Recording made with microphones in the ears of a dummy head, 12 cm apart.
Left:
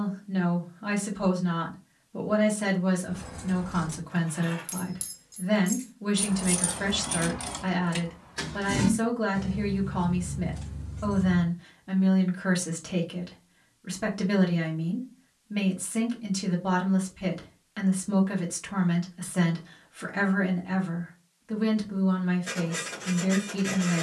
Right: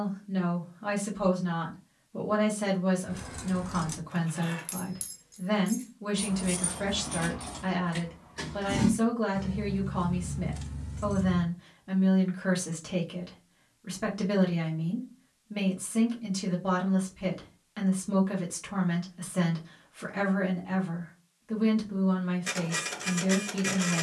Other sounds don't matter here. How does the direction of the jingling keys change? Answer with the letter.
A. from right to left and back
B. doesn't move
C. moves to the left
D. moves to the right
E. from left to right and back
A.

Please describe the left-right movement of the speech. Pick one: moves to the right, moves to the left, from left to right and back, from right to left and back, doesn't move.
doesn't move.